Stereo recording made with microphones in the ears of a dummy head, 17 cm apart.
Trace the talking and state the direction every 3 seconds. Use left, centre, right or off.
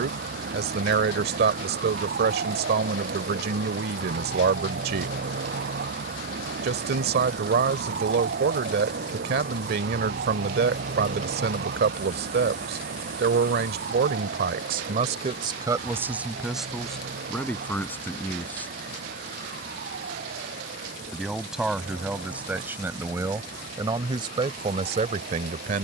right, right, right, right, right, centre, centre, centre, right.